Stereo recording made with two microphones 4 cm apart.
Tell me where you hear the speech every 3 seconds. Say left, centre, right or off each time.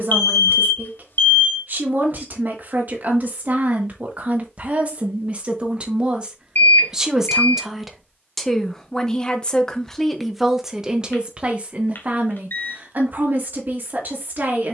right, right, centre, centre, right.